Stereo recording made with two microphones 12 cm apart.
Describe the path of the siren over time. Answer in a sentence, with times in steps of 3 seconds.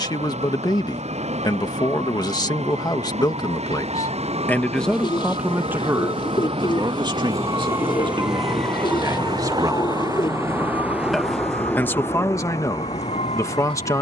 In this clip you hear the siren on the right from 0 s and on the left from 9 s.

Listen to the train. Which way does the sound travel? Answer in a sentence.
In this clip you hear the train move from right to left.